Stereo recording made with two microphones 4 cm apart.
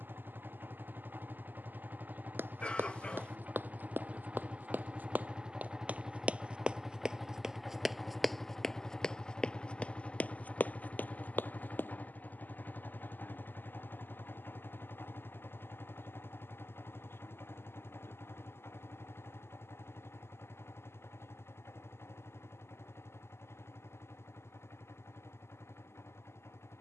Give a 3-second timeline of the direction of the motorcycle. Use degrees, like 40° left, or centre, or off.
50° right, 30° right, centre, 30° left, 50° left, 60° left, 70° left, 70° left, 80° left.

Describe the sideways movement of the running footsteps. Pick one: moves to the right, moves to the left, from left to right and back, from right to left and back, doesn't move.
moves to the left.